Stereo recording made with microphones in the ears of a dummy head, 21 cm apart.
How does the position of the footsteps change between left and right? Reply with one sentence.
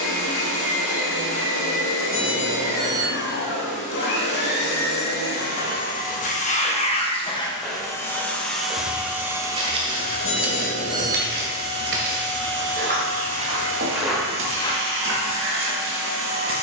You can hear the footsteps move from left to right and back again.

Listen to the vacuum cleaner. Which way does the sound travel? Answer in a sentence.
In this clip you hear the vacuum cleaner travel towards the right.